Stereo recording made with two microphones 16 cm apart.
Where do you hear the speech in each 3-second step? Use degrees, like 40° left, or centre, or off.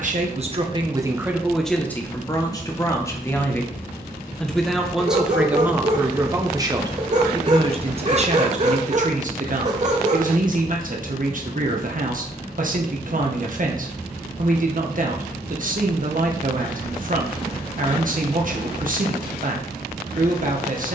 10° right, centre, 30° right, 50° right, 50° right, 50° right, 50° right.